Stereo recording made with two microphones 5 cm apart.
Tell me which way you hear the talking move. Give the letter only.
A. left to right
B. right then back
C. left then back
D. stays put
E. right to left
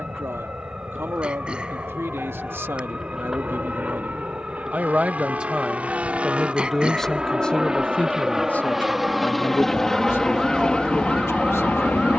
E.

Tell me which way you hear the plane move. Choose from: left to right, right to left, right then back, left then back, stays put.
right to left.